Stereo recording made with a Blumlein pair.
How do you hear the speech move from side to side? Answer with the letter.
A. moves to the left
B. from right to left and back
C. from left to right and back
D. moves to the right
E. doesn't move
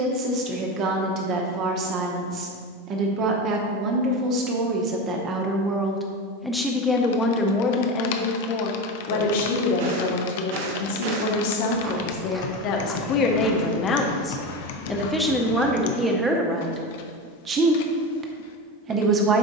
B.